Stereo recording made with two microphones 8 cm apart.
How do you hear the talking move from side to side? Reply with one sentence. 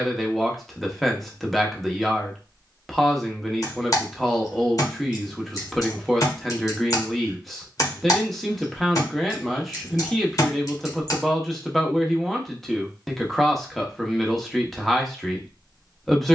In this clip you hear the talking stay put.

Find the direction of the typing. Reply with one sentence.
In this clip you hear the typing on the left.